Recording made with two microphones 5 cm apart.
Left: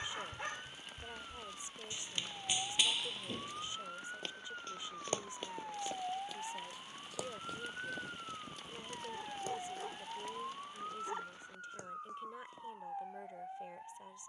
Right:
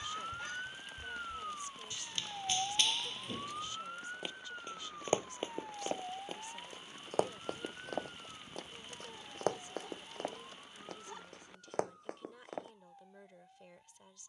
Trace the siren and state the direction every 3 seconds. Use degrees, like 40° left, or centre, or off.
30° right, centre, 30° left, 50° left, 60° left.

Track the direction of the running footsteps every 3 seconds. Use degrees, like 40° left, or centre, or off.
20° left, 10° right, 50° right, 60° right, 70° right.